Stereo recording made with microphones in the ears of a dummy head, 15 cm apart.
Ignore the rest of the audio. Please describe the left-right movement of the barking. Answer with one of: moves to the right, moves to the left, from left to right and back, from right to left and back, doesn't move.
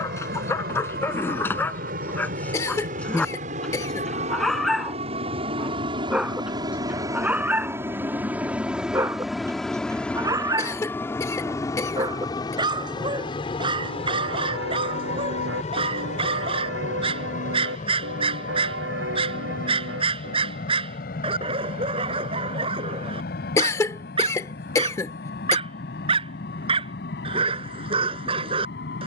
moves to the right.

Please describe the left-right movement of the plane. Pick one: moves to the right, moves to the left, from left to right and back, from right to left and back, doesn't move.
moves to the left.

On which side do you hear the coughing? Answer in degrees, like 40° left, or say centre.
20° left.